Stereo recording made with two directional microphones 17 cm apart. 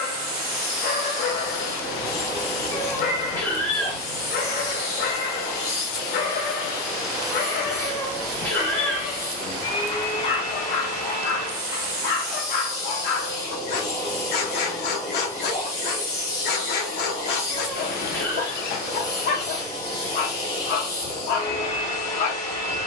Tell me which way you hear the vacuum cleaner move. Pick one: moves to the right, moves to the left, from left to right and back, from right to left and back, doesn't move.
doesn't move.